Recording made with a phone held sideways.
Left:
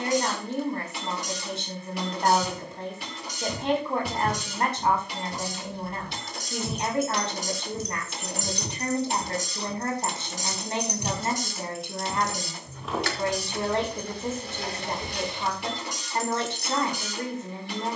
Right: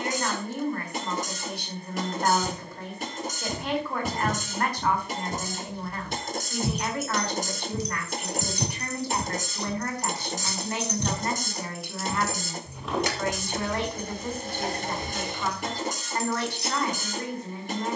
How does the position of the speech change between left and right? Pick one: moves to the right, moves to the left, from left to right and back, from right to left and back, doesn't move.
doesn't move.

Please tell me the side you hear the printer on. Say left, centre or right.
right.